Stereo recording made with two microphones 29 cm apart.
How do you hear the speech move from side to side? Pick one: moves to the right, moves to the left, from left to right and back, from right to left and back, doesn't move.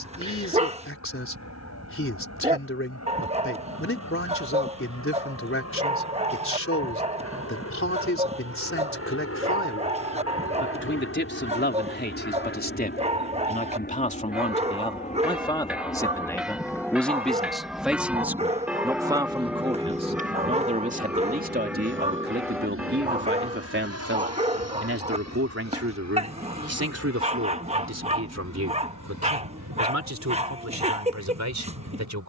moves to the right.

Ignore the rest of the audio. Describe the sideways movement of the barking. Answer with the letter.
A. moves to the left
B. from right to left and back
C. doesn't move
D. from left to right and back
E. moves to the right
C.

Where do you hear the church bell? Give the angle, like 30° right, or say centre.
centre.